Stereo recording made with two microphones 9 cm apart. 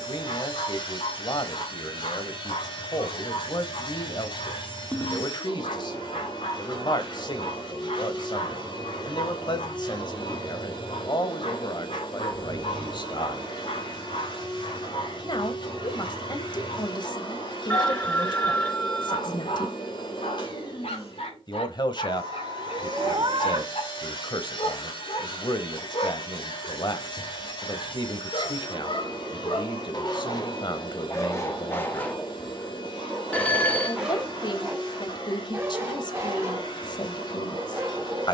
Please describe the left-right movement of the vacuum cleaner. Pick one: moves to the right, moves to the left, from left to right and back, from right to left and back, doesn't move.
doesn't move.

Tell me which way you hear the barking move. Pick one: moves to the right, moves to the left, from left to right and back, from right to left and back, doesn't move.
moves to the right.